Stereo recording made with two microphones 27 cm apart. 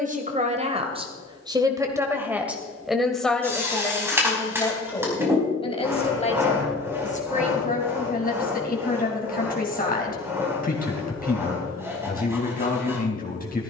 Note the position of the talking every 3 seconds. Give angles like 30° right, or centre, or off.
20° right, 10° left, 30° left, 30° left, 30° left.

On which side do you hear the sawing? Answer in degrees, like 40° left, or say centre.
10° right.